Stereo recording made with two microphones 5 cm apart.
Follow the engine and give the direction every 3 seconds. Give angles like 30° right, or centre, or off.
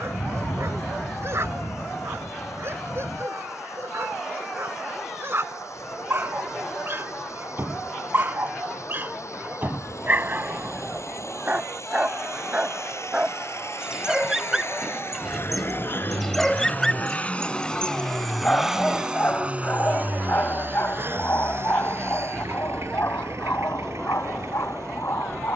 80° left, 80° left, 80° left, 70° left, 60° left, 40° left, 20° right, 60° right, 70° right.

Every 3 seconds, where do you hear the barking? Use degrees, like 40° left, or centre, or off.
60° right, 50° right, 50° right, 40° right, 20° right, centre, 30° left, 50° left, 60° left.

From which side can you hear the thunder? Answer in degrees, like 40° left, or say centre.
60° left.